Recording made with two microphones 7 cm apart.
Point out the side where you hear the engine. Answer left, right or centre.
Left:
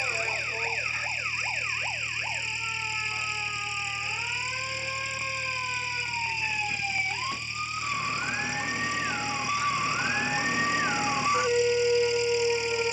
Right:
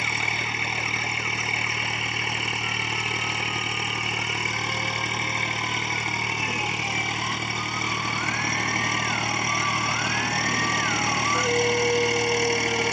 right.